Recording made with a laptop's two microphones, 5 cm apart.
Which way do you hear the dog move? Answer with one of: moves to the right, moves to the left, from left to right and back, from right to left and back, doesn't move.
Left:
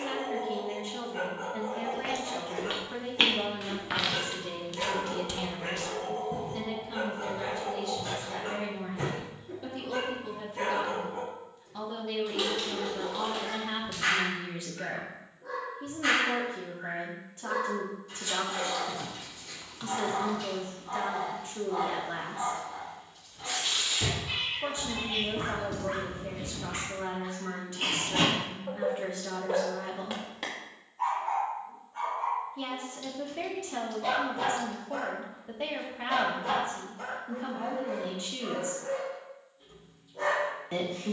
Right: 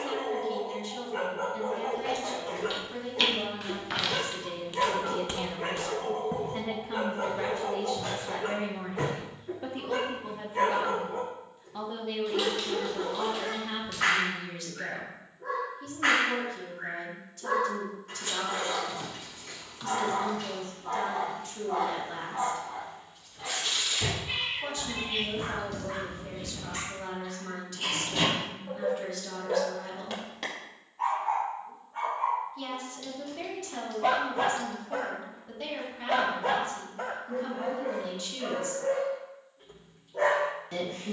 from right to left and back.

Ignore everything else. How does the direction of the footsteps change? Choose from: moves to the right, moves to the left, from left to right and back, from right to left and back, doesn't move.
moves to the right.